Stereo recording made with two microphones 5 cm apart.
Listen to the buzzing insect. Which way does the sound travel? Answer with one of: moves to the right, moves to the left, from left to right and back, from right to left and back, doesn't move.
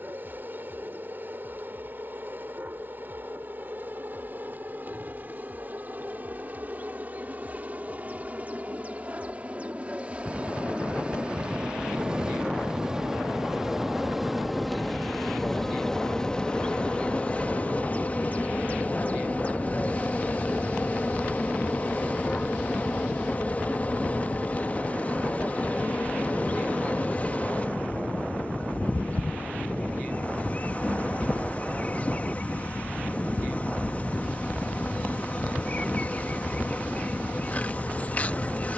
moves to the left.